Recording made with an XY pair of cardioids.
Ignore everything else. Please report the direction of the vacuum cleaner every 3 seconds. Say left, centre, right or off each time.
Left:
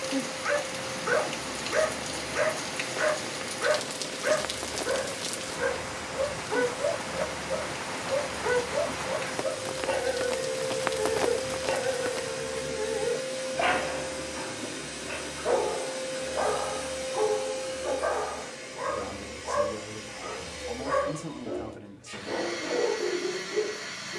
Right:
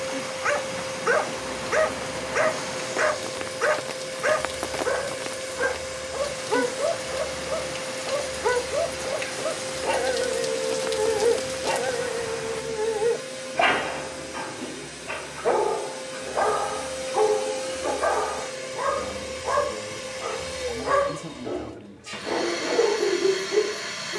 right, right, right, right, centre, centre, right, right.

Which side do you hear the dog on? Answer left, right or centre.
right.